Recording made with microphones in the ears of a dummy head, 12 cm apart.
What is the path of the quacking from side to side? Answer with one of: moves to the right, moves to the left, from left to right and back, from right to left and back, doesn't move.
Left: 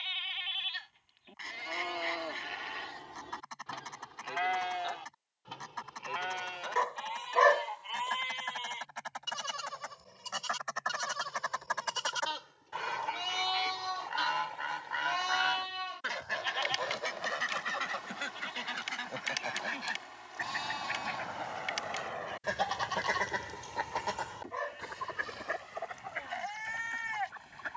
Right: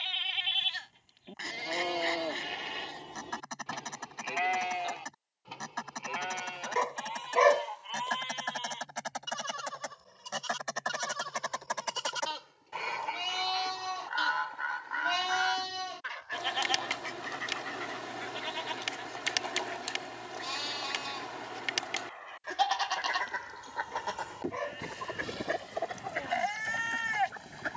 from right to left and back.